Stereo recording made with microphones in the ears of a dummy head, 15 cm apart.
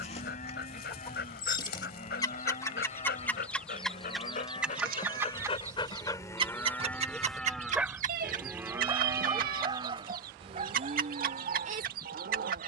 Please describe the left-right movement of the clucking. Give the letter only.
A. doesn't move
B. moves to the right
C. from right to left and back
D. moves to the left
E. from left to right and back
B.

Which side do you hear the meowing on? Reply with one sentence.
In this clip you hear the meowing on the right.